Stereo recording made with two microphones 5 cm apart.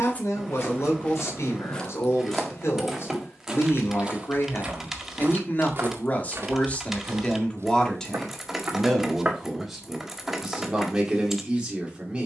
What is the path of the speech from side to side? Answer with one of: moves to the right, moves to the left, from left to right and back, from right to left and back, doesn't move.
moves to the right.